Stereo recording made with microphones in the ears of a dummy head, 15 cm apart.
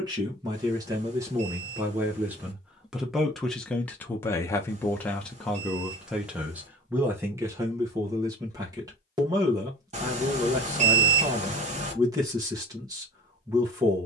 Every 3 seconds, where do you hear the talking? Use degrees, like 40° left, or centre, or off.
20° right, 10° left, 20° right, 20° right, 20° right.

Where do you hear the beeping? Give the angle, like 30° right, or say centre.
40° right.